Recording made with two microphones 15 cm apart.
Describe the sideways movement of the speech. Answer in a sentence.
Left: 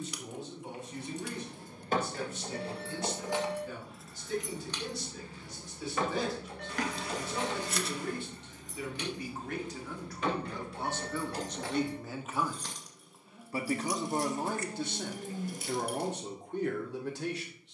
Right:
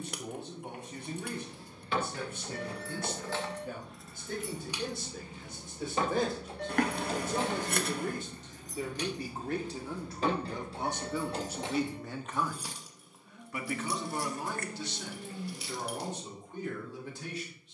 In this clip you hear the speech go from the right side to the left.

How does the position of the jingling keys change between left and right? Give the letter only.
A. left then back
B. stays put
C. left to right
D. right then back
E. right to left
D.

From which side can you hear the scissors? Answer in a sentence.
You can hear the scissors on the right.